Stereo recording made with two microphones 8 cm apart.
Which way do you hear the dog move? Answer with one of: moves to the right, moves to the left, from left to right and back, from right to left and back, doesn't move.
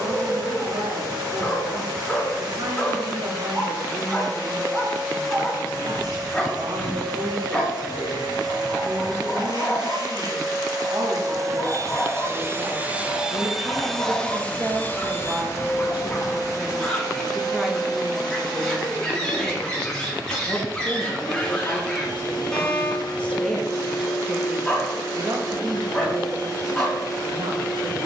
doesn't move.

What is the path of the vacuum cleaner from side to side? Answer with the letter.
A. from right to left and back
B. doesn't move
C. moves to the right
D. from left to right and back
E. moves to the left
E.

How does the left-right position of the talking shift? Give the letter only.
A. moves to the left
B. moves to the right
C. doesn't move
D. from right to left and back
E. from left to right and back
D.